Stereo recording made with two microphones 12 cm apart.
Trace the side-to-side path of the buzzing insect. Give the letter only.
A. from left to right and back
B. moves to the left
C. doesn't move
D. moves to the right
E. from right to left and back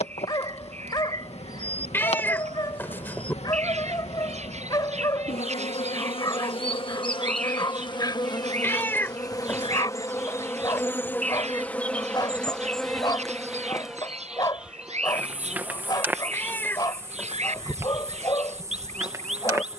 D.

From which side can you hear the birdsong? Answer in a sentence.
You can hear the birdsong on the right.